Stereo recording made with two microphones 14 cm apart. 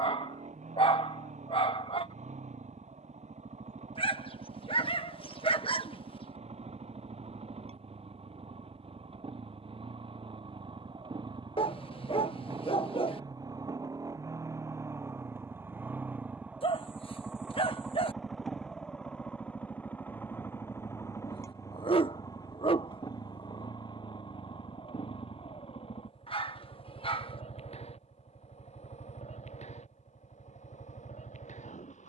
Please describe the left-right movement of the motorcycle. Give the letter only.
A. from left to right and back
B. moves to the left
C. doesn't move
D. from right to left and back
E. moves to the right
B.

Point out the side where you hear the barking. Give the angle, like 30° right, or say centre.
40° left.